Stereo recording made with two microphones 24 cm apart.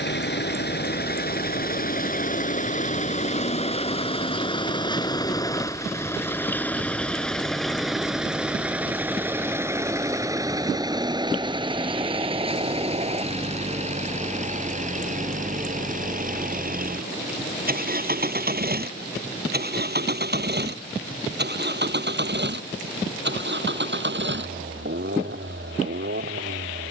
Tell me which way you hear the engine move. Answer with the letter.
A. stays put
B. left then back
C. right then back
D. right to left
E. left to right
E.